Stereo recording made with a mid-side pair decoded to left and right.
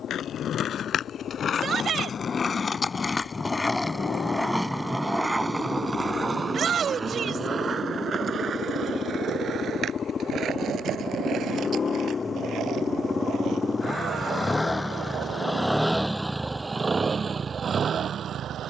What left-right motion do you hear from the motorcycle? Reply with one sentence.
In this clip you hear the motorcycle travel towards the right.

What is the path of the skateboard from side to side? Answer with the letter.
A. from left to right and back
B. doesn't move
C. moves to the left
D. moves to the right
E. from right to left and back
D.